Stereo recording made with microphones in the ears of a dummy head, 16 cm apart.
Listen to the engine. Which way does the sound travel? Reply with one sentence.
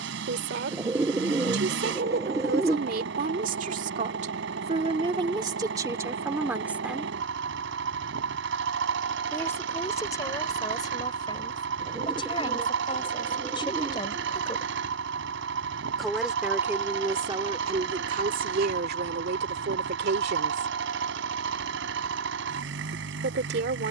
You can hear the engine stay put.